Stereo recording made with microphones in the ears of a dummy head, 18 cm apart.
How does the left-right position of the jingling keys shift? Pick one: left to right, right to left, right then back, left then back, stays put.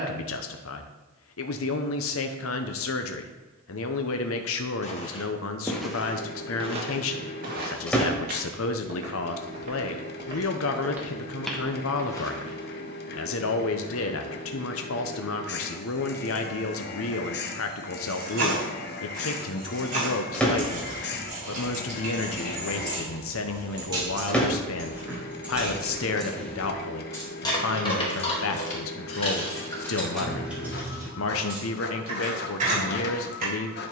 left then back.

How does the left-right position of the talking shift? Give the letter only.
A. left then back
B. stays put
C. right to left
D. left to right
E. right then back
B.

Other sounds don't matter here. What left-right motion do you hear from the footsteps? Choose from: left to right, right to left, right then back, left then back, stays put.
right then back.